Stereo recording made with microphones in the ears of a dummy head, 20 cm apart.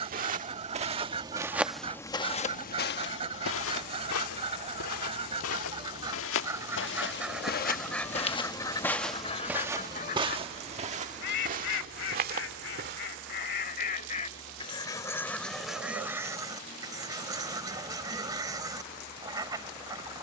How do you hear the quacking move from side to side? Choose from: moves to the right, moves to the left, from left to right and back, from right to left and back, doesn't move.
from right to left and back.